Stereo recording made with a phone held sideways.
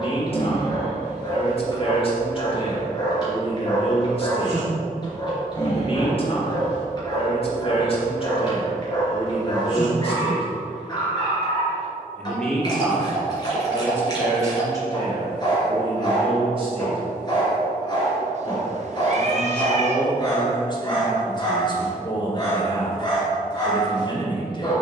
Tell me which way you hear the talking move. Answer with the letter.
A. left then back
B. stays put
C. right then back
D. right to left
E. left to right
C.